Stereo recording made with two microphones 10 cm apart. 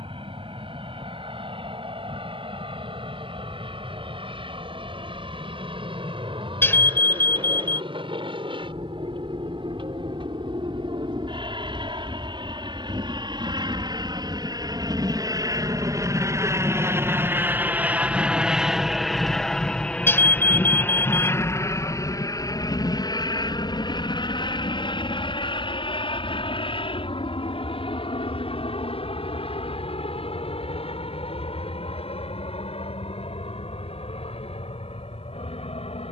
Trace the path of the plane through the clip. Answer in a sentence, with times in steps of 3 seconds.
You can hear the plane on the right from 0 s, in the centre from 18 s and on the left from 21 s.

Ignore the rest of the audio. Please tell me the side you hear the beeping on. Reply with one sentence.
In this clip you hear the beeping on the left.